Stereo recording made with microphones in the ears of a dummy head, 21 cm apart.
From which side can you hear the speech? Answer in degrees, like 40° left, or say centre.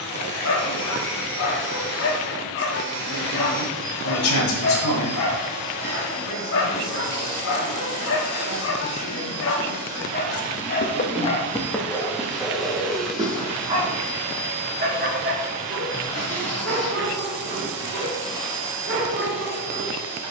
60° left.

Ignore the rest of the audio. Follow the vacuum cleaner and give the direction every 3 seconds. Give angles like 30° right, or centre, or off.
50° right, 50° right, 30° right, 10° right, centre, centre, 30° right.